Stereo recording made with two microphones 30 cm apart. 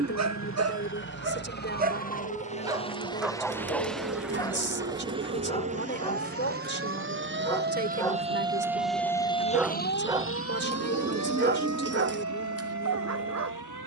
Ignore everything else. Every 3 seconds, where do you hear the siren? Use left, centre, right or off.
right, right, right, left, left.